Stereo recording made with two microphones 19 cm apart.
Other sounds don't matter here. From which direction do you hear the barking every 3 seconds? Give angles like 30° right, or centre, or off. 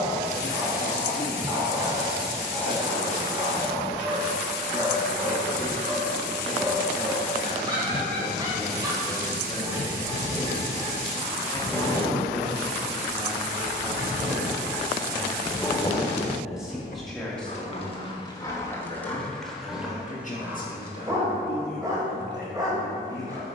20° right, 20° right, 20° right, 20° right, 20° right, 30° left, centre, 20° right.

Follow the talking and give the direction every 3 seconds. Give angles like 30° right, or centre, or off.
70° left, 70° left, 50° left, 20° left, centre, centre, 30° left, 70° left.